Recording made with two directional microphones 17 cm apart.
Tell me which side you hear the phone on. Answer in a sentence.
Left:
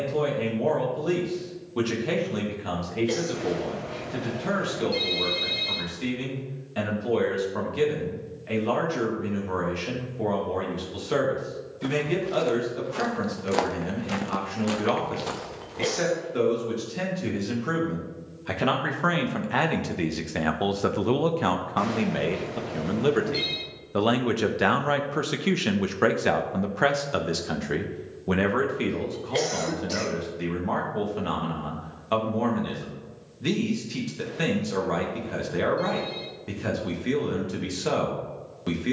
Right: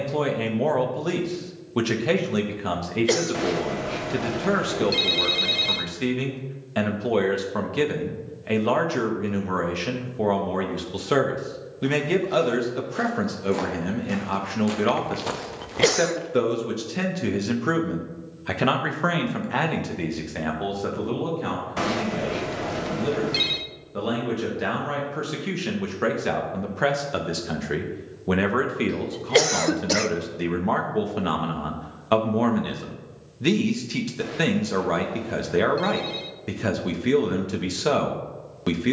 You can hear the phone on the right.